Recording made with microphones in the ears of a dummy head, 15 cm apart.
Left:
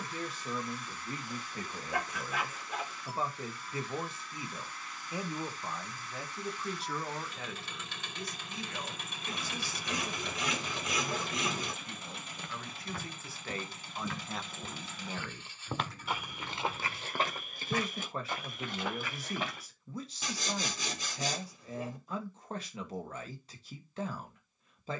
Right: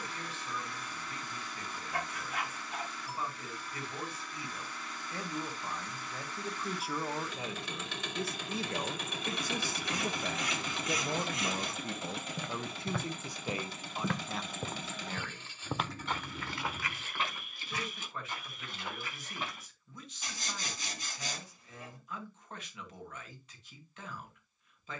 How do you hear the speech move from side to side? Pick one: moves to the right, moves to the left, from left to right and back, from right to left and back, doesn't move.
from left to right and back.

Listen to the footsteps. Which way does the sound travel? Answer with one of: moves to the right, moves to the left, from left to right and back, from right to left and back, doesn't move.
moves to the left.